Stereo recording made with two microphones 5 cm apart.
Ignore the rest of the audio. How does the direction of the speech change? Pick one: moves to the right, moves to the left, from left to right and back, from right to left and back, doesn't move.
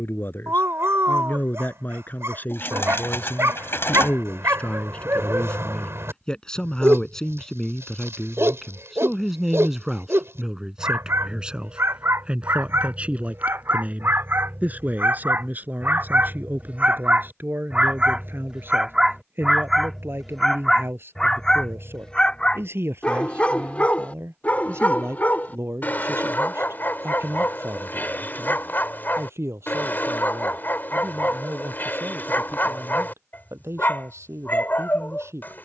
moves to the right.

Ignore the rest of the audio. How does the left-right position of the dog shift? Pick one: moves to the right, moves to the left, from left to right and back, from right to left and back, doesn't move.
moves to the left.